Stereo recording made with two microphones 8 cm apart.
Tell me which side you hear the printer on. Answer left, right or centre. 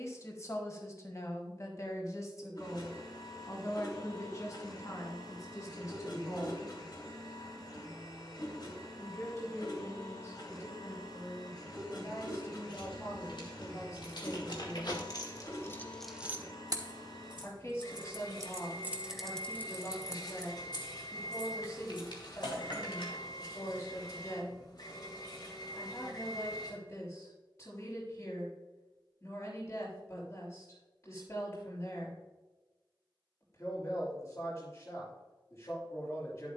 left.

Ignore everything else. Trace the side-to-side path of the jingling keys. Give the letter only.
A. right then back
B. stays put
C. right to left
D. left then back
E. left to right
A.